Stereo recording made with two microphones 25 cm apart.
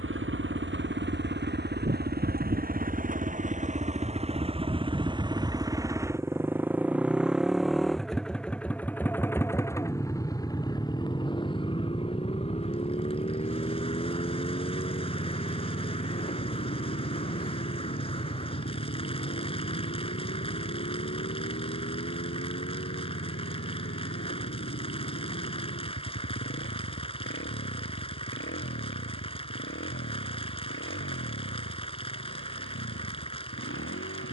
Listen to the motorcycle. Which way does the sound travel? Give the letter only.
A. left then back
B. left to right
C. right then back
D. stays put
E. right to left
E.